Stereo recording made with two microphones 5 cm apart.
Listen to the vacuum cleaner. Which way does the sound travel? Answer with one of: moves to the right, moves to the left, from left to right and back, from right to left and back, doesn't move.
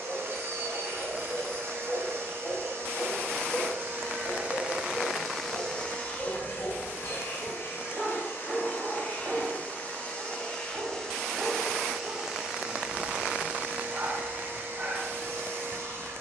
from right to left and back.